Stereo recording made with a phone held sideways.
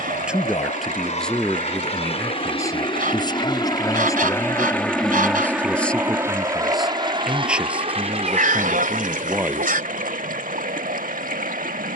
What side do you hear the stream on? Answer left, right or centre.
right.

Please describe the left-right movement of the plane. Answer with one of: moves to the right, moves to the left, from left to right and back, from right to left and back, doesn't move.
moves to the right.